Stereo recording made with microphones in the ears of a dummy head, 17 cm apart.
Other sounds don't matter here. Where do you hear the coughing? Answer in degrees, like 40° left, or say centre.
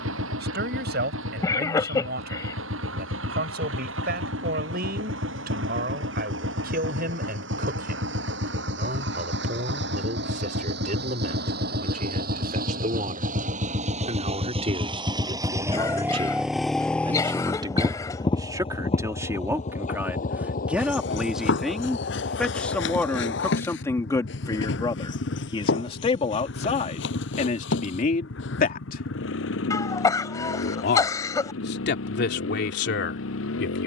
20° left.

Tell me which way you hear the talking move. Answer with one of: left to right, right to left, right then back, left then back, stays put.
right to left.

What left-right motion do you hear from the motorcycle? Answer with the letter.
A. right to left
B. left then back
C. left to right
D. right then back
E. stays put
A.